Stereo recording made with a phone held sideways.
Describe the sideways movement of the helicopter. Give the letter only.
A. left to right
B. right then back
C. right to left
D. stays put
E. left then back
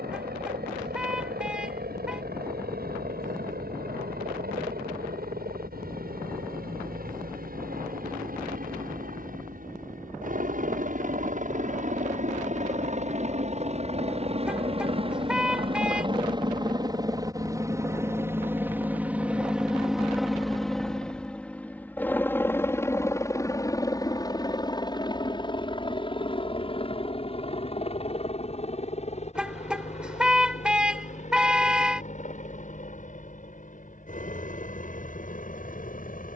C.